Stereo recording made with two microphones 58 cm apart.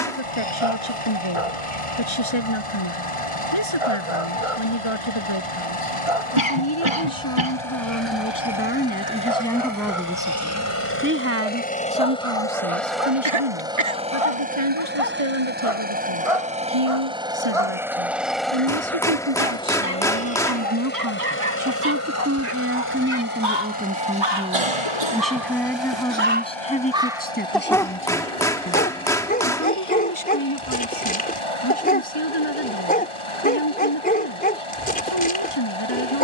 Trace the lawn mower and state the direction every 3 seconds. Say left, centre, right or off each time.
left, left, left, left, centre, centre, centre, left, left, left, left, left.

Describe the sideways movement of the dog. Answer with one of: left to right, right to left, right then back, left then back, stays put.
right to left.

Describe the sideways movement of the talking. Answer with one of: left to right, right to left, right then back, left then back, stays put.
right then back.